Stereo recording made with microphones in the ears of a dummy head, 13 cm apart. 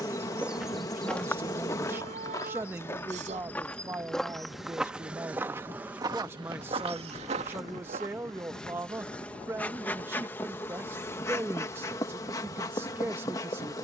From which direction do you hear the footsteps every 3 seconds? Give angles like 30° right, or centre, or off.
10° left, centre, 50° right, off, off.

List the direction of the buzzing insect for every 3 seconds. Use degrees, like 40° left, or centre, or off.
20° left, centre, centre, 10° left, 20° left.